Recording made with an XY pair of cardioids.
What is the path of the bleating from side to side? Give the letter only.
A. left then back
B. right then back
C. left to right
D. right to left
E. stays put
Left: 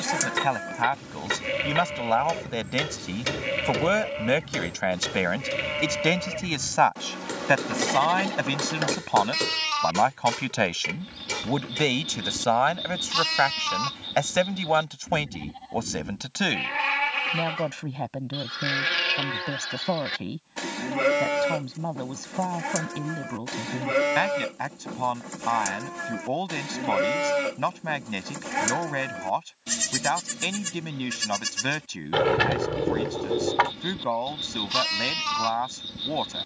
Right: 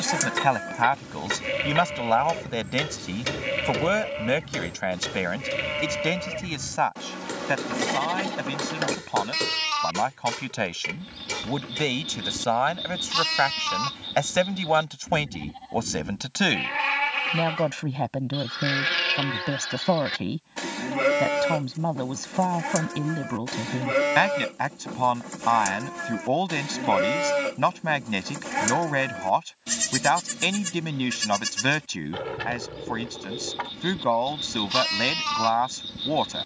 E.